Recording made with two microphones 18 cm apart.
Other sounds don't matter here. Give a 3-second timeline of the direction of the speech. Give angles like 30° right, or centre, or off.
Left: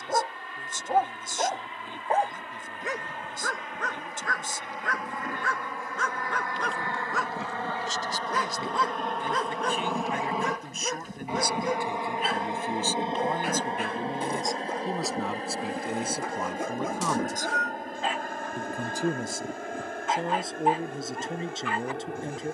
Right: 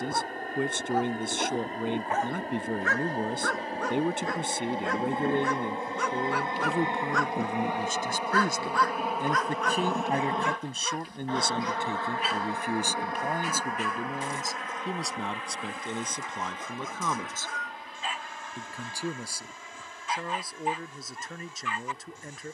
70° right, 70° right, 60° right, 30° right, 10° right, 10° left, 20° left, 30° left.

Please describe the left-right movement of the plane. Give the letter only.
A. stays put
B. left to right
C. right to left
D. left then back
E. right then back
C.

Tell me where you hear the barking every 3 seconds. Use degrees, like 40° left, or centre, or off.
40° left, 10° right, 10° left, 40° left, 60° left, 60° left, 60° left, 60° left.